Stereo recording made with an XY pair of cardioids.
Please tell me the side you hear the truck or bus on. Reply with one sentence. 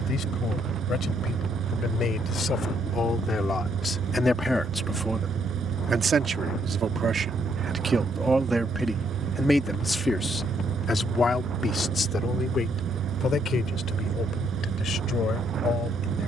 In this clip you hear the truck or bus on the right.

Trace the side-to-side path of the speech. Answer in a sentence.
In this clip you hear the speech go right and come back.